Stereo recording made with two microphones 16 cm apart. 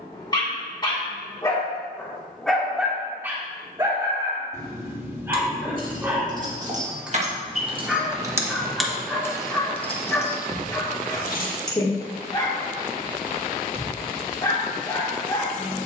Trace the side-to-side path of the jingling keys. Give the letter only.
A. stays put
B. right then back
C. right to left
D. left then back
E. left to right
C.